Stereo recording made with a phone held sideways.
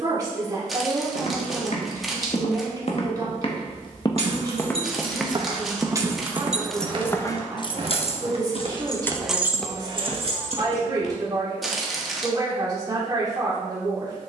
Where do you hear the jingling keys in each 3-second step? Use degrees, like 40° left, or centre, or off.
off, 40° right, 20° left, 30° right, off.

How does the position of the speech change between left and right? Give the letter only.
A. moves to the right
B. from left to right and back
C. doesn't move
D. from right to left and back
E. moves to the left
C.